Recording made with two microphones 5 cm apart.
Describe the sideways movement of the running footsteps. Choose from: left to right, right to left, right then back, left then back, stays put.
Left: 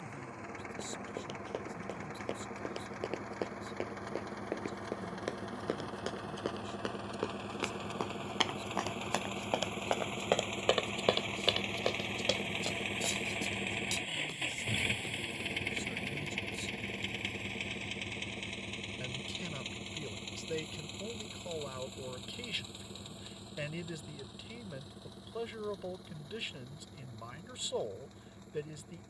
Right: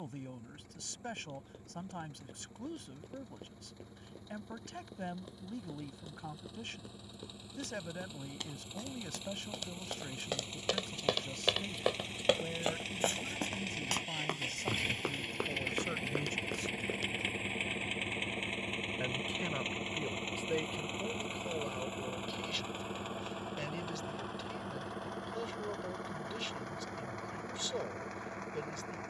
left to right.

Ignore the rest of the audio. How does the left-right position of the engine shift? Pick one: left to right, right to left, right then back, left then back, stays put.
left to right.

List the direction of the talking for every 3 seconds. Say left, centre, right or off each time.
right, right, right, right, right, right, right, centre, centre, centre.